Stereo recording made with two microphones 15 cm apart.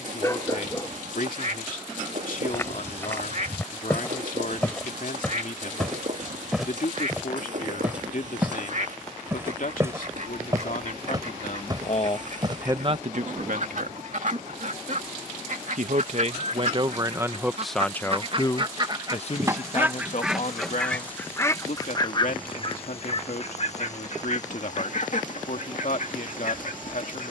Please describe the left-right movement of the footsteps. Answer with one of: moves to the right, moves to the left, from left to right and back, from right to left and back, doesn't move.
moves to the right.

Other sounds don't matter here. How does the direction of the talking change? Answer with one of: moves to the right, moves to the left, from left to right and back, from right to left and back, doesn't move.
from left to right and back.